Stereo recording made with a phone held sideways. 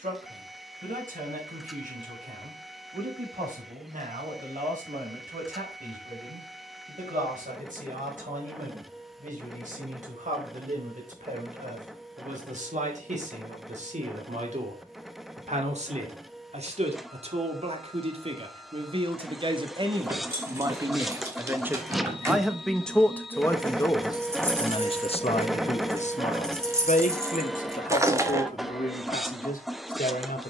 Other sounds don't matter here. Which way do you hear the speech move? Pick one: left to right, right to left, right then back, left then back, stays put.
right to left.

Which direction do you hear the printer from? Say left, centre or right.
centre.